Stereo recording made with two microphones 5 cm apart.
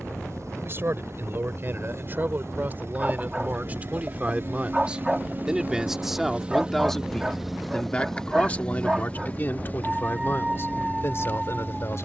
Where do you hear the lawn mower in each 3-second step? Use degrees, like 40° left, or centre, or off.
70° right, 50° right, centre, 40° left.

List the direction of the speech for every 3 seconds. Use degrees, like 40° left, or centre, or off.
40° right, 30° right, 10° left, 50° left.